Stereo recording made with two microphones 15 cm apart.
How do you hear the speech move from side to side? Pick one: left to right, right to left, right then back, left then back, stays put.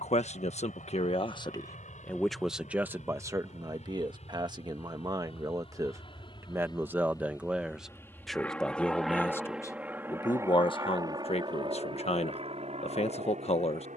right then back.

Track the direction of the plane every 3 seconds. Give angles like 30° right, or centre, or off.
60° left, 50° left, 20° left, 20° right, 40° right.